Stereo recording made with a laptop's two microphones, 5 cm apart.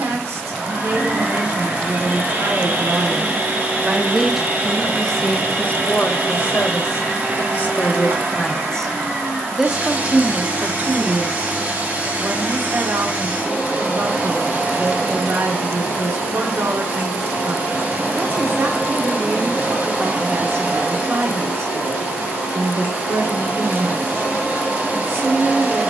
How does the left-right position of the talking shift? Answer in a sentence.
You can hear the talking move from right to left and back again.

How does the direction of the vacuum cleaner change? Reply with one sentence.
You can hear the vacuum cleaner stay in one place.